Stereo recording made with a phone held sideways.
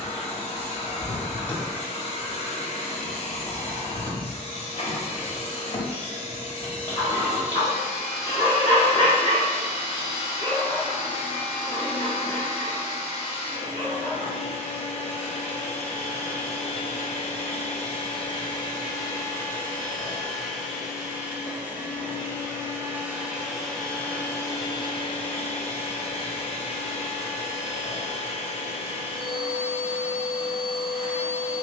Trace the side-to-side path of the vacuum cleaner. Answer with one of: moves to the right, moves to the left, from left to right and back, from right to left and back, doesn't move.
from left to right and back.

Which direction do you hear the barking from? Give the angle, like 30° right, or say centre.
30° left.